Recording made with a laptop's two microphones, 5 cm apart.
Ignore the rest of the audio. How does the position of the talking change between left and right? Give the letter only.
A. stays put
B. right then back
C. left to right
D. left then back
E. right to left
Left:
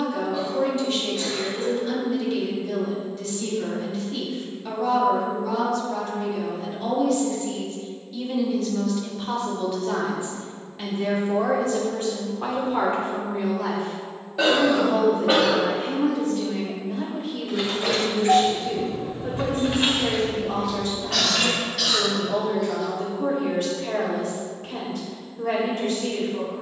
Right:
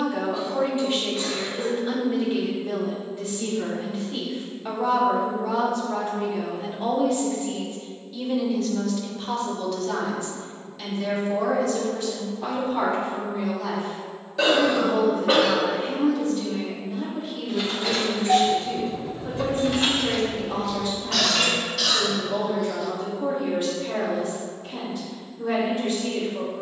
E.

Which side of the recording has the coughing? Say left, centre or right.
centre.